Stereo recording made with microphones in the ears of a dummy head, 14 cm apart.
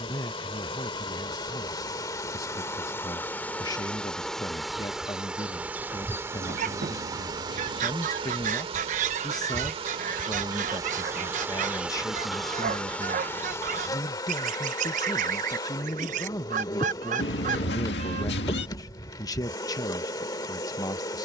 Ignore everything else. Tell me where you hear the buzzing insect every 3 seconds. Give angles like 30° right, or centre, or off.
30° left, centre, 30° right, 30° right, 10° left, 20° left, 20° left.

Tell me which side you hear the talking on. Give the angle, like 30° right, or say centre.
20° left.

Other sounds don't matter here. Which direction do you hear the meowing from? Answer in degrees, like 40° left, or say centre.
80° left.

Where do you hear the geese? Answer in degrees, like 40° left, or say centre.
50° right.